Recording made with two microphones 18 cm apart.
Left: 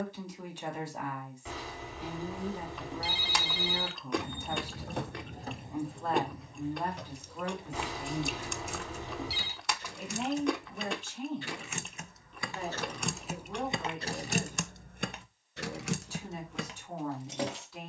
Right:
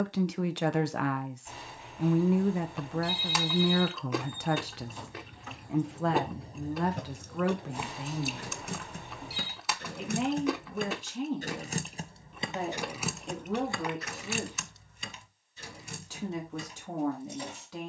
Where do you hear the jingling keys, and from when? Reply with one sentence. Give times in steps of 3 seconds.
In this clip you hear the jingling keys not at all from 0 s, on the left from 3 s, on the right from 6 s, in the centre from 12 s and on the left from 15 s.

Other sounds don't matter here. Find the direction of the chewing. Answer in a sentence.
You can hear the chewing in the centre.